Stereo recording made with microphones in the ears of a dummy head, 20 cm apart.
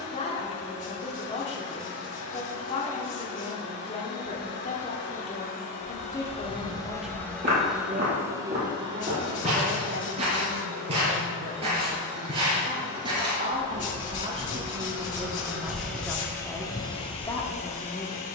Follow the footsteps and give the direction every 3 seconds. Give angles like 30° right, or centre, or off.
off, off, 40° right, 30° right, 20° right, centre.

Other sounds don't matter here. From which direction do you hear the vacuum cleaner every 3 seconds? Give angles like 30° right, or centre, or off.
50° left, 50° left, centre, 40° right, 30° right, 10° left.